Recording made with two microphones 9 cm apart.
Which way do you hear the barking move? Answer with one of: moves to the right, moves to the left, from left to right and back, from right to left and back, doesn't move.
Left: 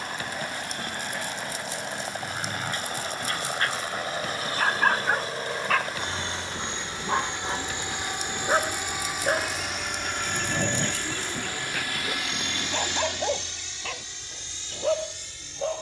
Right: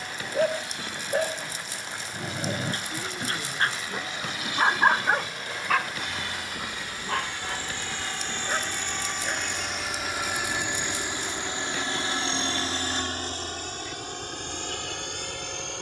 moves to the left.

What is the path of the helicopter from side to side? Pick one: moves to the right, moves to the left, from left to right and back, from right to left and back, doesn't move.
moves to the right.